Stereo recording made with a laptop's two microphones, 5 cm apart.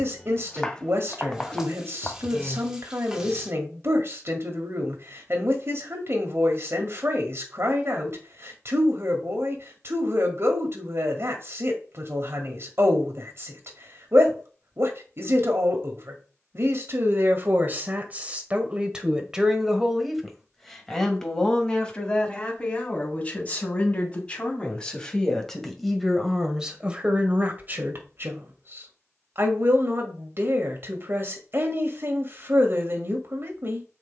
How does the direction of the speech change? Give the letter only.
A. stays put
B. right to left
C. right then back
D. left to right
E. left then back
E.